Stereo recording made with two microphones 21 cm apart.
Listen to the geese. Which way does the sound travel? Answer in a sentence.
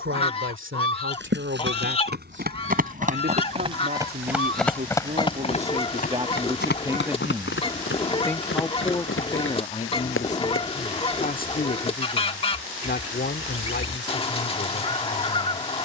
You can hear the geese stay in one place.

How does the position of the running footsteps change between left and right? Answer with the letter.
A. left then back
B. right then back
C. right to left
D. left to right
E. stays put
C.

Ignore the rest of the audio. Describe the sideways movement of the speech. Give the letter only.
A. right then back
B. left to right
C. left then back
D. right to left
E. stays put
D.